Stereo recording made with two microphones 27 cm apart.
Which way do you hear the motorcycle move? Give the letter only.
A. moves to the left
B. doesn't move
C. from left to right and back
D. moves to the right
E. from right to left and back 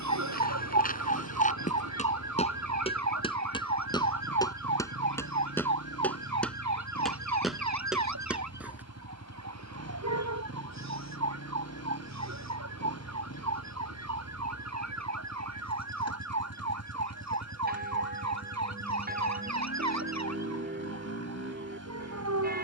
B.